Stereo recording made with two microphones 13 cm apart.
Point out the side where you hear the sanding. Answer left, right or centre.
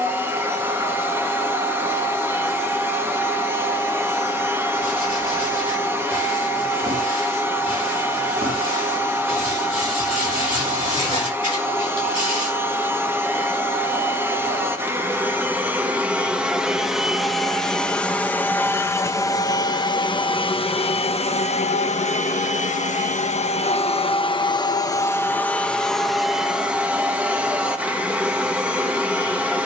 left.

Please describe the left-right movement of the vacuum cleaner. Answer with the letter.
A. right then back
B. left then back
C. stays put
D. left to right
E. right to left
B.